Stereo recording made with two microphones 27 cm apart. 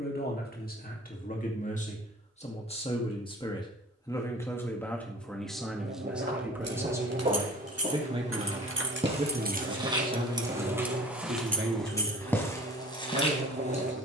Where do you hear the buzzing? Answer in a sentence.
In this clip you hear the buzzing on the right.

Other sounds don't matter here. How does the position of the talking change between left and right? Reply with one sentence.
You can hear the talking travel towards the right.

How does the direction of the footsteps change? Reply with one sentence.
You can hear the footsteps go from the right side to the left.